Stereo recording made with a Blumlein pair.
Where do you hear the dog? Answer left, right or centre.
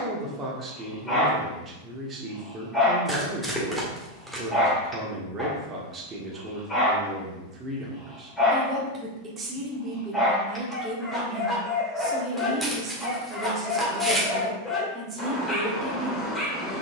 centre.